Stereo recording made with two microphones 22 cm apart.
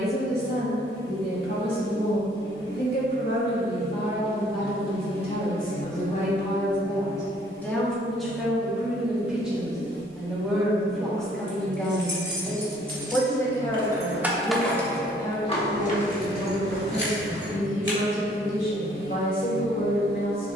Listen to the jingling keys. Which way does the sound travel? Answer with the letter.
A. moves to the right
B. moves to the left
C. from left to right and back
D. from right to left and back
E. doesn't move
B.